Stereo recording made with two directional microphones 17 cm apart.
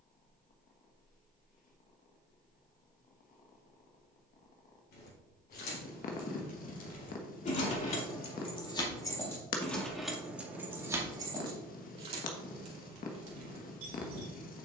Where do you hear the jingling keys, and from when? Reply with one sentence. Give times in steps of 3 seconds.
In this clip you hear the jingling keys not at all from 0 s, on the left from 3 s, in the centre from 9 s and on the right from 12 s.